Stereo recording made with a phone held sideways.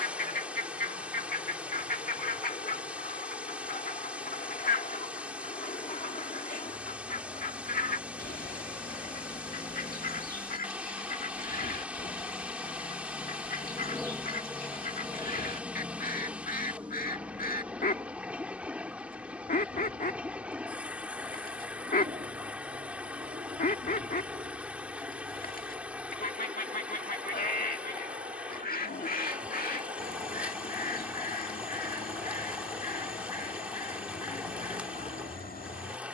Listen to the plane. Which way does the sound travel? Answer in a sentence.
In this clip you hear the plane travel towards the right.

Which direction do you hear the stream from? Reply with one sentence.
You can hear the stream in the centre.